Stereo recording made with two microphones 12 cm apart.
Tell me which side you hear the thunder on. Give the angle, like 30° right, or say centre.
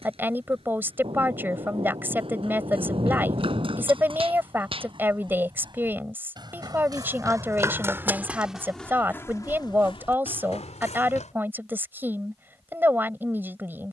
50° right.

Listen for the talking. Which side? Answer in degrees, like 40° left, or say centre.
20° right.